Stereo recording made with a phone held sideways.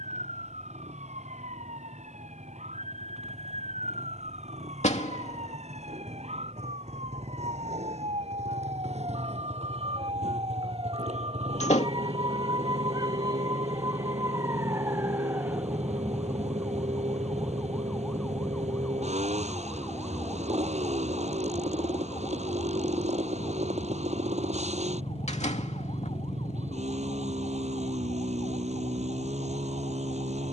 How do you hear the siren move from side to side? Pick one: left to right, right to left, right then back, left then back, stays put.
right to left.